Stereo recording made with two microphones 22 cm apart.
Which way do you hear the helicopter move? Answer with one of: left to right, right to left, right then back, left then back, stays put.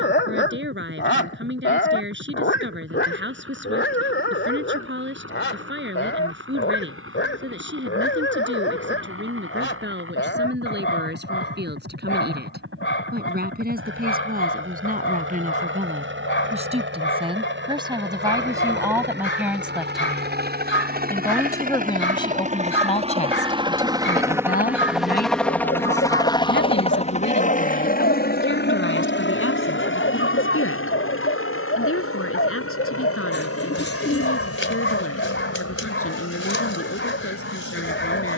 right to left.